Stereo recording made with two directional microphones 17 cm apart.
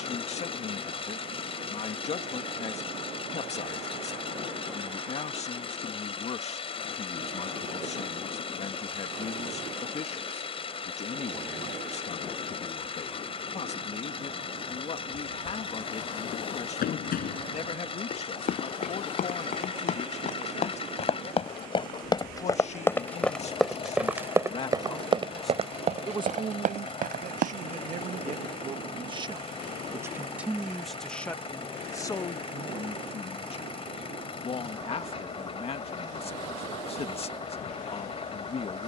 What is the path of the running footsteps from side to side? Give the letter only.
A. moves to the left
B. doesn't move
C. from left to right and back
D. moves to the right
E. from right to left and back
D.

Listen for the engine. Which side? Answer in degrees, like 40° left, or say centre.
30° left.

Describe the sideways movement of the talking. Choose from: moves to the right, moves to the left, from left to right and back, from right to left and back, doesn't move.
from left to right and back.